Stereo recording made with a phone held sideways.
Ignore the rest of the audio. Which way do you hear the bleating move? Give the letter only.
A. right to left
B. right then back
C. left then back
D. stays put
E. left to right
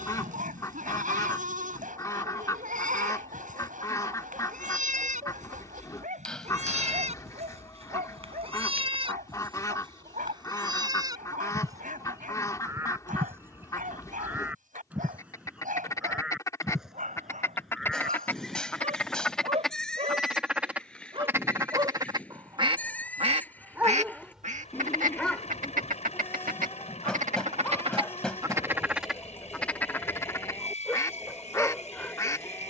A.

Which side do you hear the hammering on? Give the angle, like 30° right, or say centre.
10° left.